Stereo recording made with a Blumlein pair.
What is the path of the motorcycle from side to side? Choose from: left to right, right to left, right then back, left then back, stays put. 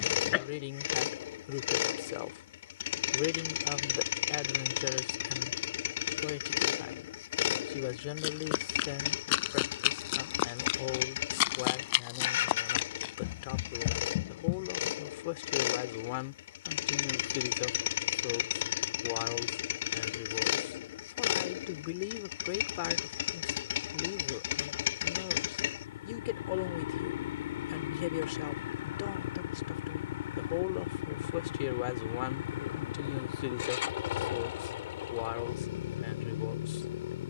stays put.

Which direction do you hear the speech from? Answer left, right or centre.
left.